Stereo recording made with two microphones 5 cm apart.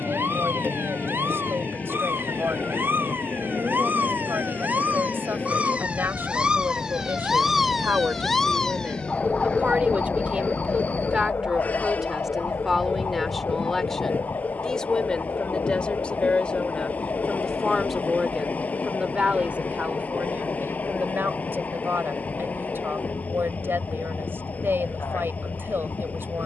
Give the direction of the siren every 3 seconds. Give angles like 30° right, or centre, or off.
60° right, 40° right, 10° right, 40° left, 60° left, 70° left, 80° left, 80° left, 80° left.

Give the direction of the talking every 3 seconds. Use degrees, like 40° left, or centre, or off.
60° right, 60° right, 50° right, 20° right, centre, 20° left, 30° right, 50° right, 60° right.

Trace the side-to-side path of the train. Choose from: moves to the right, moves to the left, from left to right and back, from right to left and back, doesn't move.
doesn't move.